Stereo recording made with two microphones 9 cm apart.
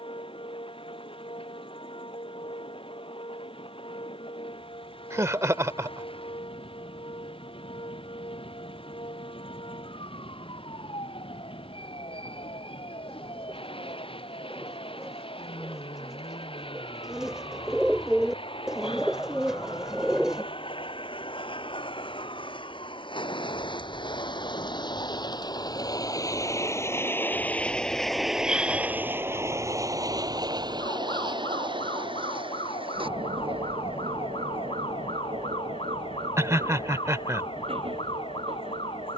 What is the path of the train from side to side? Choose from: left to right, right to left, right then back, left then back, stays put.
left to right.